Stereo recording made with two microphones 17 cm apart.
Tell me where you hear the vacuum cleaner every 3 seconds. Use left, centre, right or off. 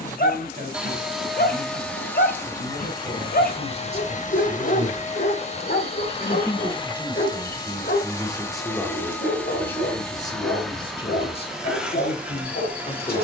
centre, left, left, centre, centre.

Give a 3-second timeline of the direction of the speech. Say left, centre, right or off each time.
right, right, centre, left, left.